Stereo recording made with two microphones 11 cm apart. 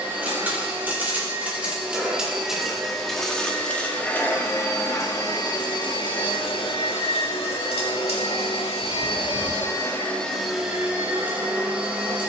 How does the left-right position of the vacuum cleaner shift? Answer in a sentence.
In this clip you hear the vacuum cleaner go left and come back.